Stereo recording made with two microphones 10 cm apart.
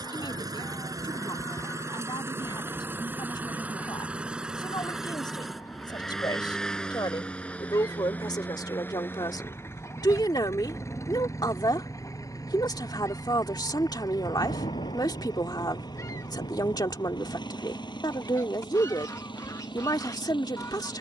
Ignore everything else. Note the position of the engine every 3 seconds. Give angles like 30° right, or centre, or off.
30° right, 10° right, 10° left, 30° left, 40° left, 40° left, 50° left.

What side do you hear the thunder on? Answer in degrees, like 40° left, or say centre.
90° left.